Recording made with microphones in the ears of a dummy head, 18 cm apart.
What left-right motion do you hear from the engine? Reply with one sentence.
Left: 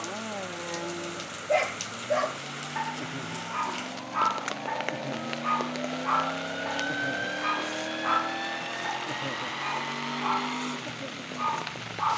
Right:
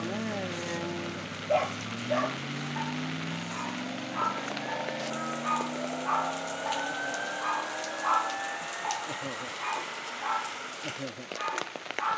You can hear the engine move to the left.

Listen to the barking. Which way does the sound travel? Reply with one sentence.
You can hear the barking go left and come back.